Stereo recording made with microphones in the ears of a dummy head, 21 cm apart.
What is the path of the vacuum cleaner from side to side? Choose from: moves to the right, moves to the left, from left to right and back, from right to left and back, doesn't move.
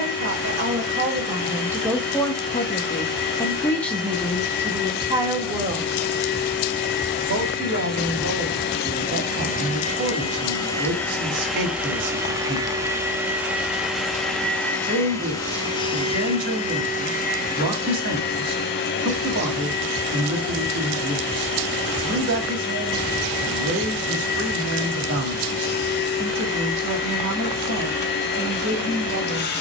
from left to right and back.